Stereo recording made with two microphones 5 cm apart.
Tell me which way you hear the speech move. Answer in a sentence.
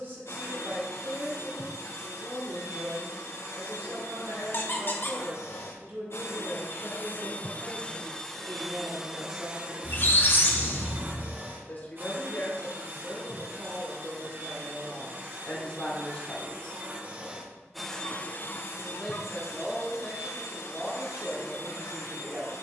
You can hear the speech go left and come back.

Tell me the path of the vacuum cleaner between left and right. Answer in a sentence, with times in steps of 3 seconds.
You can hear the vacuum cleaner on the left from 0 s, on the right from 9 s and on the left from 18 s.